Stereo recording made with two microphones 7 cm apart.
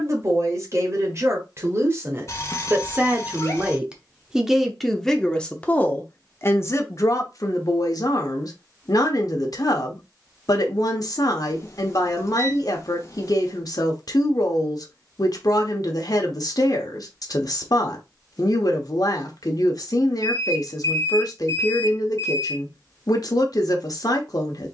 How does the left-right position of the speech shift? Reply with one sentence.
In this clip you hear the speech go from the right side to the left.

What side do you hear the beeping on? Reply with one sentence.
In this clip you hear the beeping on the left.